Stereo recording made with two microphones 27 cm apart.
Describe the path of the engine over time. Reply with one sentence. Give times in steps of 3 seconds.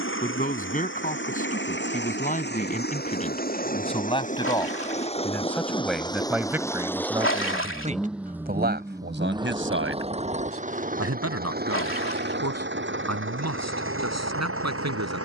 You can hear the engine on the left from 0 s, in the centre from 6 s and on the right from 9 s.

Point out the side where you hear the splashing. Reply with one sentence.
In this clip you hear the splashing on the left.